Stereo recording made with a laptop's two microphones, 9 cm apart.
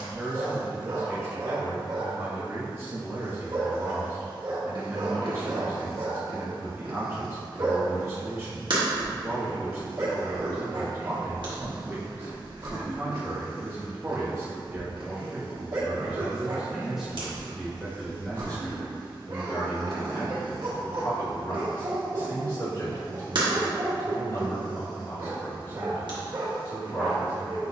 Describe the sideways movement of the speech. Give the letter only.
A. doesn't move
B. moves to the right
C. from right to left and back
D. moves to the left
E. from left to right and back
D.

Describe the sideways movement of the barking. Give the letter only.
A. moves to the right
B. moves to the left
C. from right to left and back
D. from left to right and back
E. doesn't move
E.